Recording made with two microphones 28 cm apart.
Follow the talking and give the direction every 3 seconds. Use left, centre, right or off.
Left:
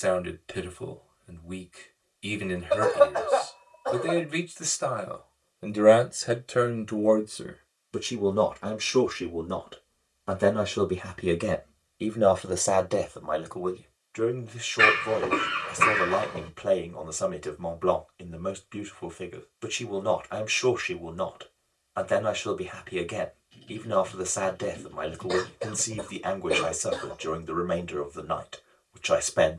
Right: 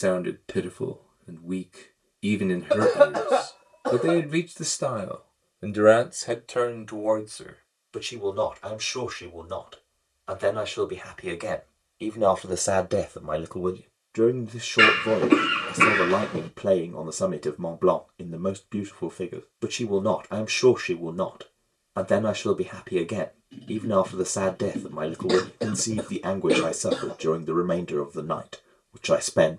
right, right, left, left, right, right, right, right, right, right.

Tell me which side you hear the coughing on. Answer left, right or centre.
right.